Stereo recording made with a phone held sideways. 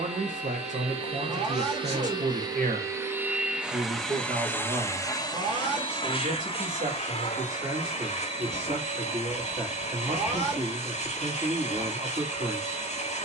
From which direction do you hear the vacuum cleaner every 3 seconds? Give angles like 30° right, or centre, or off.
40° right, 10° left, 60° left, 60° left, 60° left.